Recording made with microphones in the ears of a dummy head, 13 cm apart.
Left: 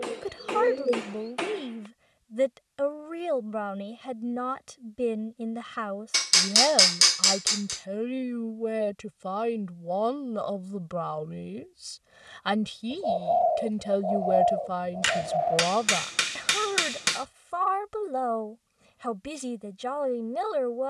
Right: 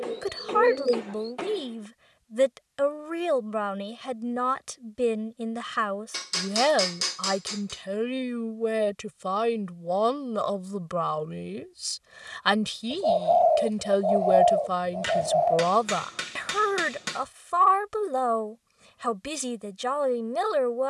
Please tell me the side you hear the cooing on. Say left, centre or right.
right.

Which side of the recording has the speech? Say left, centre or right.
right.